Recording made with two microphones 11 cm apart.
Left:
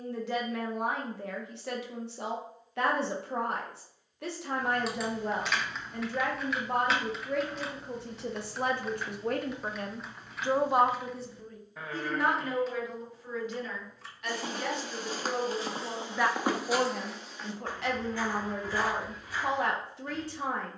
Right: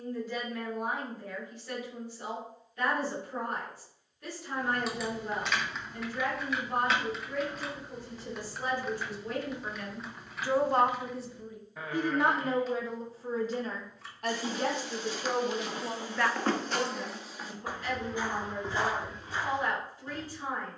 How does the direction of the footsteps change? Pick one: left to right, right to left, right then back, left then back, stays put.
left to right.